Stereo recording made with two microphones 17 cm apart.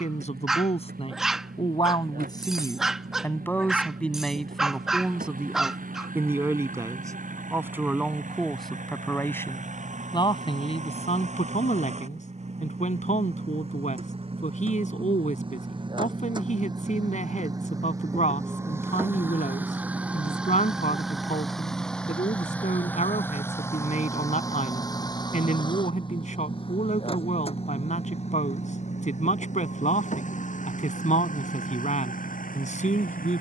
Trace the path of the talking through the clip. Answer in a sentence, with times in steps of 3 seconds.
In this clip you hear the talking on the left from 0 s, in the centre from 3 s and on the left from 9 s.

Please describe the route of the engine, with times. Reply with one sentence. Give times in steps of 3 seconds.
You can hear the engine on the right from 0 s, in the centre from 18 s and on the left from 24 s.